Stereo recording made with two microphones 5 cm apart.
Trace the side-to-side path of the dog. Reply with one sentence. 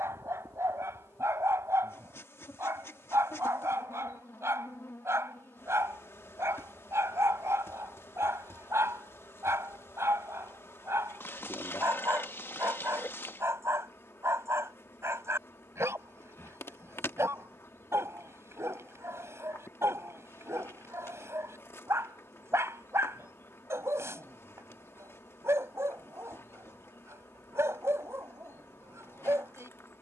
In this clip you hear the dog stay put.